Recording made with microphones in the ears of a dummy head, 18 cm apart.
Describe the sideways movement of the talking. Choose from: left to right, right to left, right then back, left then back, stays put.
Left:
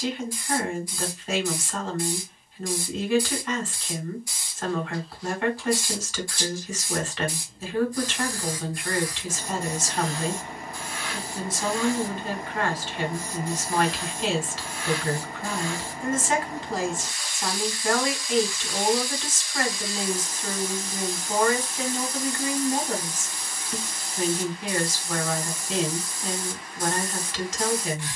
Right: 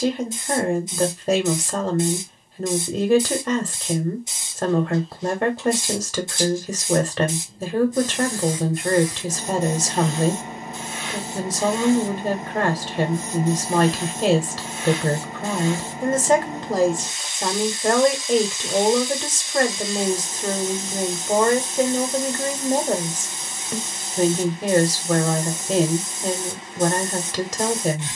stays put.